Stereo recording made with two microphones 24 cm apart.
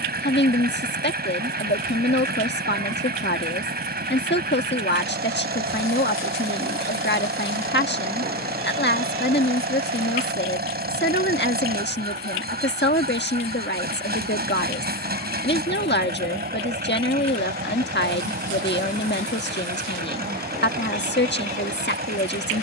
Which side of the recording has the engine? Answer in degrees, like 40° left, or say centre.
40° right.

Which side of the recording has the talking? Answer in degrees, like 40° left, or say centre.
50° left.